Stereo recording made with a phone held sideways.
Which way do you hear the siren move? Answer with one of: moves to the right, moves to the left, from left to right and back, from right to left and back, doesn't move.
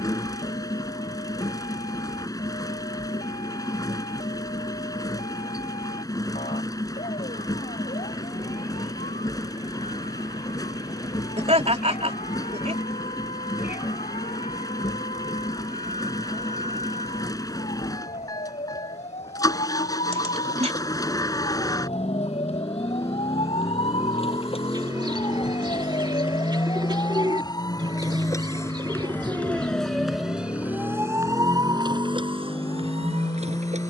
moves to the right.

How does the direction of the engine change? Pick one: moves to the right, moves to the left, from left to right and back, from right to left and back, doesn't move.
doesn't move.